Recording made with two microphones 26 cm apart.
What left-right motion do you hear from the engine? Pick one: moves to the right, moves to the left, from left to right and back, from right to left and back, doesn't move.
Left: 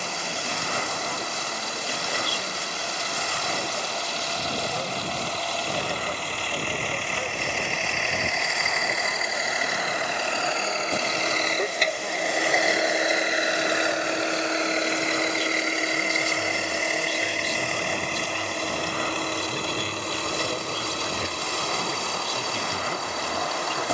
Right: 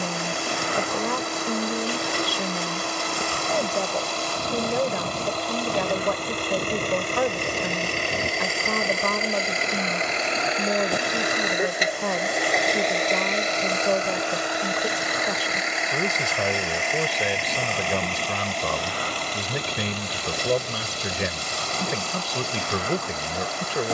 moves to the left.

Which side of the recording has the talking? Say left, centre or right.
right.